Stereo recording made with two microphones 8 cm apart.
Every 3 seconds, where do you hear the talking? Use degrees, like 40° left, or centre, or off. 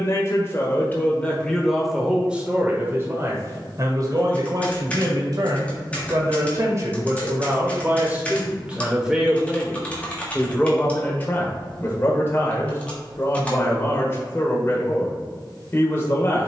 10° left, 50° right, 30° right, 10° left, 30° left, 30° left.